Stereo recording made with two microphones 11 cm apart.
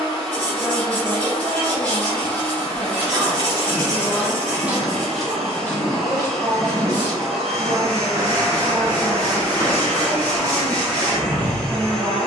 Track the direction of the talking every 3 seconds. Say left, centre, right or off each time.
centre, right, right, right.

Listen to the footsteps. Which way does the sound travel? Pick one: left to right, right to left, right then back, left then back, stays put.
left then back.